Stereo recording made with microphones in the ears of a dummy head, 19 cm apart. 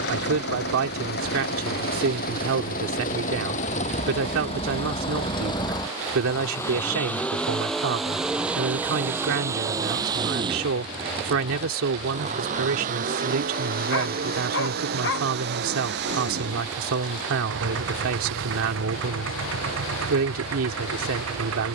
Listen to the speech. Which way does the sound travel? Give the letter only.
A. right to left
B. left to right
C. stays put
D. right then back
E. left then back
C.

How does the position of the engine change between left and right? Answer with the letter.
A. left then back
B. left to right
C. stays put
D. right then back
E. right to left
B.